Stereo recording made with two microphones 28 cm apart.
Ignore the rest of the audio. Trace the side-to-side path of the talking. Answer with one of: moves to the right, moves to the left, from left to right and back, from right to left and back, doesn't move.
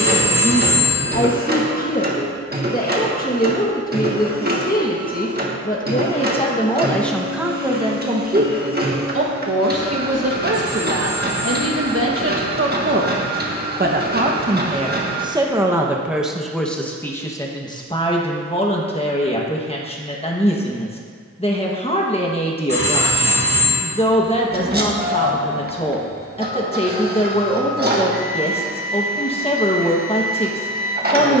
from left to right and back.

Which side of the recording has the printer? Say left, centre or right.
right.